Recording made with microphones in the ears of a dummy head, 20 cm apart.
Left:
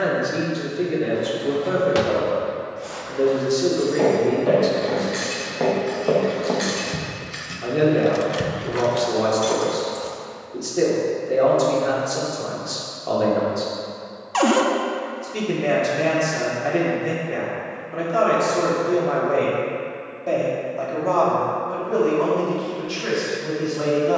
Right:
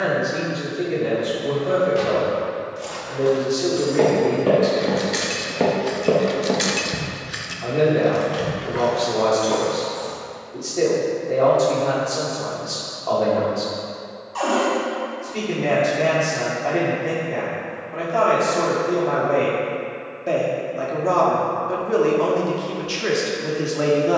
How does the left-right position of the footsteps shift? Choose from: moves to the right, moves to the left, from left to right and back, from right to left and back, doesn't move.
moves to the left.